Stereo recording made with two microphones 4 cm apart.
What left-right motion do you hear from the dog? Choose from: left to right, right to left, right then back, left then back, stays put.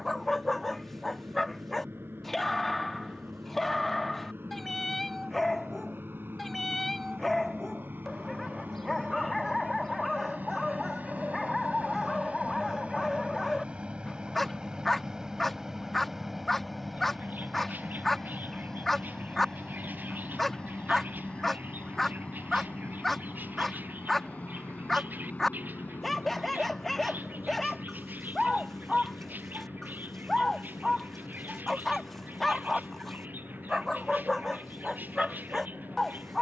stays put.